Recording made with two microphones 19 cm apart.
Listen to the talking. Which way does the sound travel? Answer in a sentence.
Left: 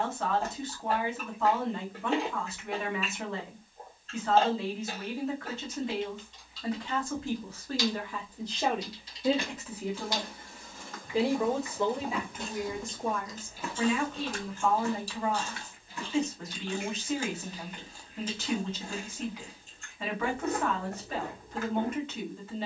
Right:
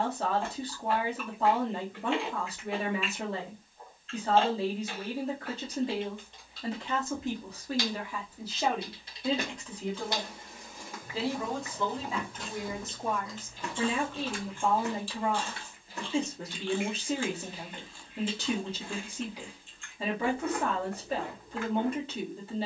You can hear the talking go left and come back.